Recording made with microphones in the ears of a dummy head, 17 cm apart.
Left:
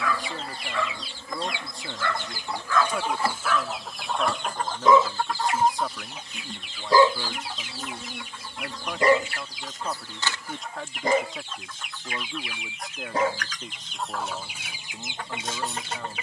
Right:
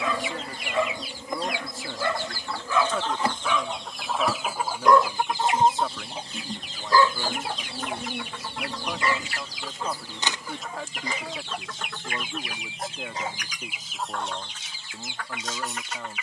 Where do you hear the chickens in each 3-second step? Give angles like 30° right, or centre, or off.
20° left, 10° right, 40° right, 60° right, 10° right, 30° left.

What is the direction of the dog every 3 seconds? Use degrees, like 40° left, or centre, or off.
20° right, centre, 20° left, 40° left, 50° left, 50° left.